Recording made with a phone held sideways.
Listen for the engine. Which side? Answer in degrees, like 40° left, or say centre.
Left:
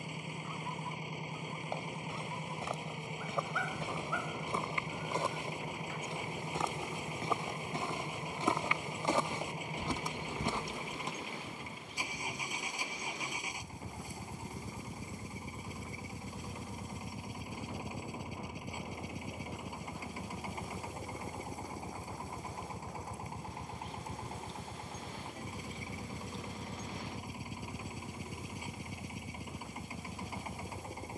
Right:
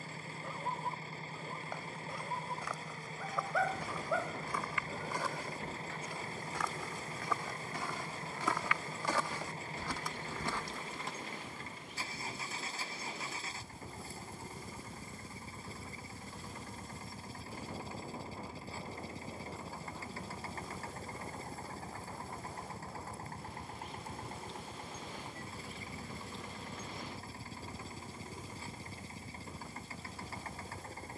10° left.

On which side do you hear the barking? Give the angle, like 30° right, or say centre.
70° right.